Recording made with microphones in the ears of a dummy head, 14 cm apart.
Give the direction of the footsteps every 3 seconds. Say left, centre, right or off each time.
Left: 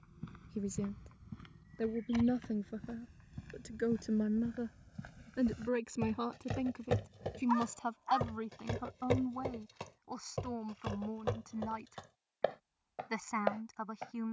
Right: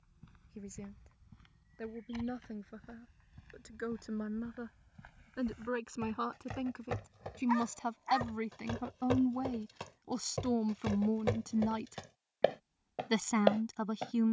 left, left, left, centre, right.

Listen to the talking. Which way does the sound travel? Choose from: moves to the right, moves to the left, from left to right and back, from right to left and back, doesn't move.
moves to the right.